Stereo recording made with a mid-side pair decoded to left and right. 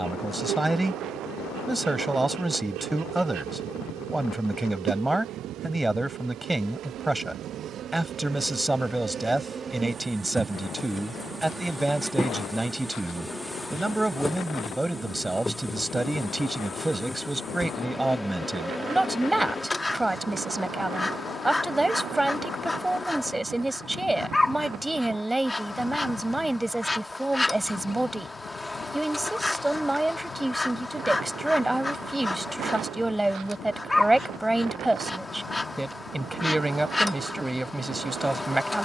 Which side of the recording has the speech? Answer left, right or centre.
centre.